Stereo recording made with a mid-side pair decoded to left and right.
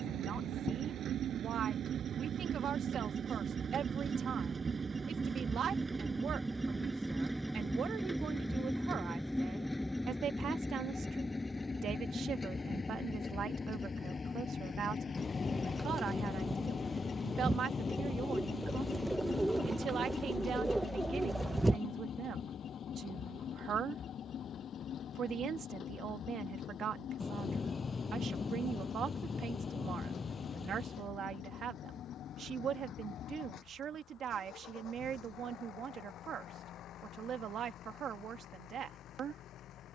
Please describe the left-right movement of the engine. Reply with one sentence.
You can hear the engine move to the left.